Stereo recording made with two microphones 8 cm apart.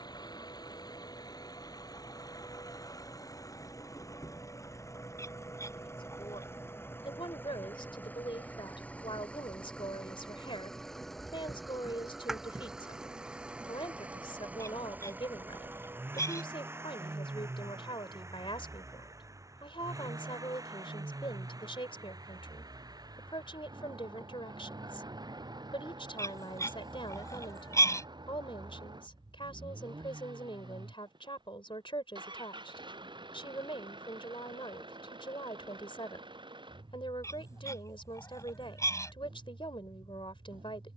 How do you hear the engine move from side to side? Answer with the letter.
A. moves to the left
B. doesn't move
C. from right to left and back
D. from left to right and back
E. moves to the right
E.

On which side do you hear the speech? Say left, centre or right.
left.